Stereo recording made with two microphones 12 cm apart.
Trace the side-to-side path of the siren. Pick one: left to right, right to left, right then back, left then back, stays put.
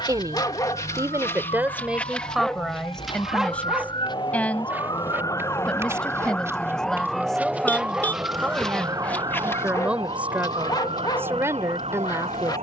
left to right.